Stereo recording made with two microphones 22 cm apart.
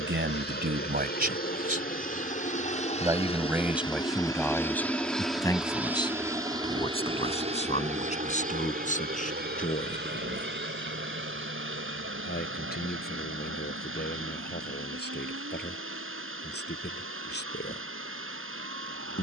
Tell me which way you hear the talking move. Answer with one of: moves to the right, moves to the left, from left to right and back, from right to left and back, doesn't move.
moves to the left.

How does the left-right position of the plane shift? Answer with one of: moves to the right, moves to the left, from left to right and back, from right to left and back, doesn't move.
moves to the right.